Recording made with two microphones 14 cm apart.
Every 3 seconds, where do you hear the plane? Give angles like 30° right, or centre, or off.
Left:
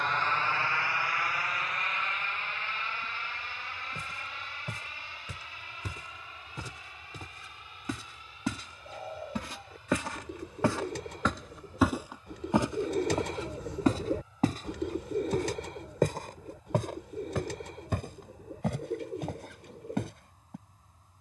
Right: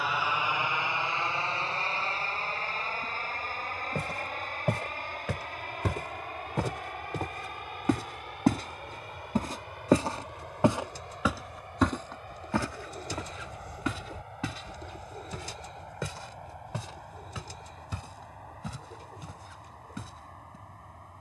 30° right, 50° right, 50° right, 60° right, 60° right, 60° right, 60° right.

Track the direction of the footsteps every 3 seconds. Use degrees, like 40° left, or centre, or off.
off, 80° right, 60° right, 20° right, 30° left, 50° left, 60° left.